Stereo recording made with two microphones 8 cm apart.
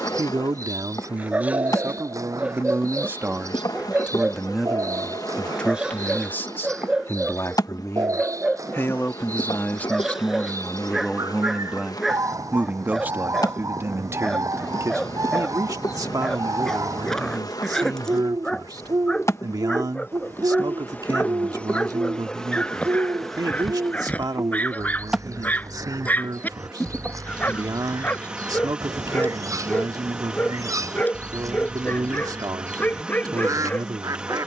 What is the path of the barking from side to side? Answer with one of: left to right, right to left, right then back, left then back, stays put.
right to left.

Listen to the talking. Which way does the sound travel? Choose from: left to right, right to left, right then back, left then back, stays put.
left then back.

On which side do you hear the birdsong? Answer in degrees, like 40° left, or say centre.
40° right.